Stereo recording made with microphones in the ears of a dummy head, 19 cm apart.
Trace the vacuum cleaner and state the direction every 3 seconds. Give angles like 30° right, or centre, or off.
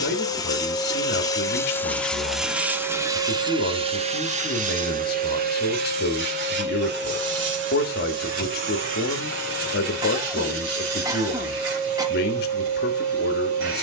10° left, 30° right, 60° right, 60° right, 60° right.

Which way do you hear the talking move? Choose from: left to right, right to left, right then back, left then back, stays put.
stays put.